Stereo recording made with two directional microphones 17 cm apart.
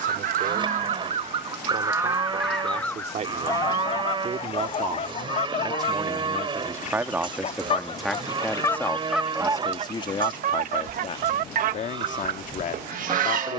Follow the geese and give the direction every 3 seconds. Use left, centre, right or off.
right, left, left, right, right.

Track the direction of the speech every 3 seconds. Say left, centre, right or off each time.
right, right, centre, left, left.